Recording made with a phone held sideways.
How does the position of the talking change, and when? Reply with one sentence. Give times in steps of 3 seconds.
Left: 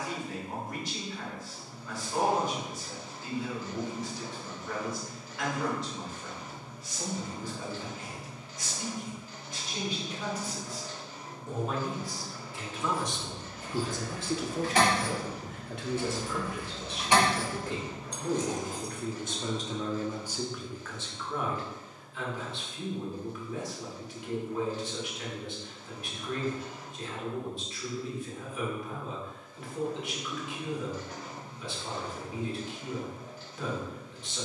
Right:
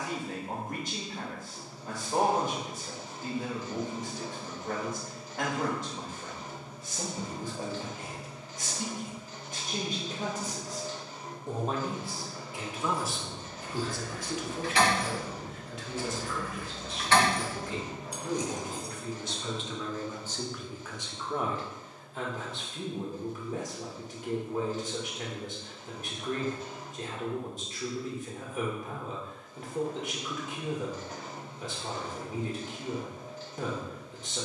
In this clip you hear the talking on the right from 0 s, in the centre from 12 s, on the left from 15 s and on the right from 21 s.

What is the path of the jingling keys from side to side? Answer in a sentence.
You can hear the jingling keys move to the right.